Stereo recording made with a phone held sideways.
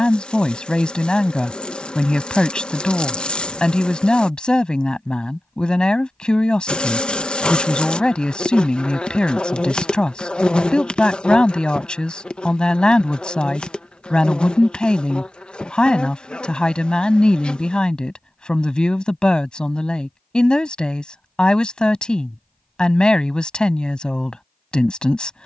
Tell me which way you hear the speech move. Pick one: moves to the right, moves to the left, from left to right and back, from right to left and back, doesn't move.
doesn't move.